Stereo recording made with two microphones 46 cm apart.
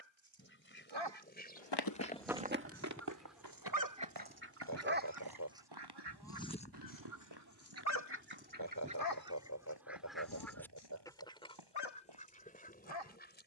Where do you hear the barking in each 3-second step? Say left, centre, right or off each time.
right, right, left, left, left.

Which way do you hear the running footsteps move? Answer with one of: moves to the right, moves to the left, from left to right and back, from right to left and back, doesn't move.
moves to the right.